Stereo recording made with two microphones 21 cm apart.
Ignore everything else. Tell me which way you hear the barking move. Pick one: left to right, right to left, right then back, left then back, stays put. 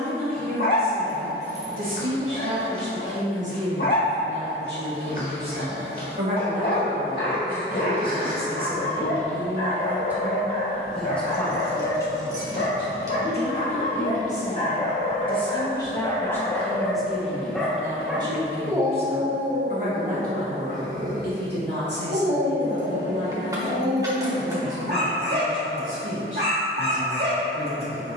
left to right.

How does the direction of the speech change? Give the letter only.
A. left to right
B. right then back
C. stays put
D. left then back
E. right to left
D.